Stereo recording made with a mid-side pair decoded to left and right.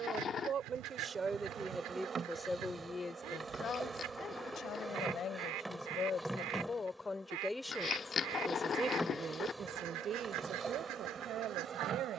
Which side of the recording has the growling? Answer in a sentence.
You can hear the growling on the left.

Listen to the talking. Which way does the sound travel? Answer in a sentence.
You can hear the talking go left and come back.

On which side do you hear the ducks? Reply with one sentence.
You can hear the ducks on the right.